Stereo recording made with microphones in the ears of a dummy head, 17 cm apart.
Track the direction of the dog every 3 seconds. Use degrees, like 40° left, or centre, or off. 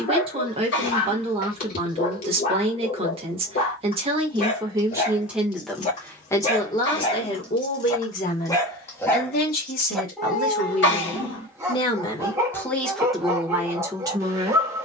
50° left, 40° left, 30° left, centre, 20° right.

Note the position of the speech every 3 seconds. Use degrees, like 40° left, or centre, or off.
30° right, 20° right, 30° left, 40° left, centre.